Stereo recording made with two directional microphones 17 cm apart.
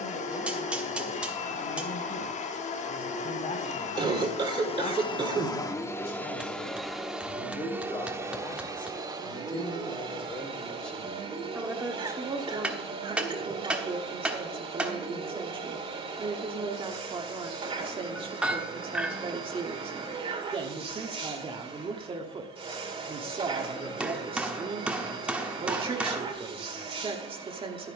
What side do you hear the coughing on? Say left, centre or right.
right.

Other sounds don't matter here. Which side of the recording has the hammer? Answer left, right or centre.
centre.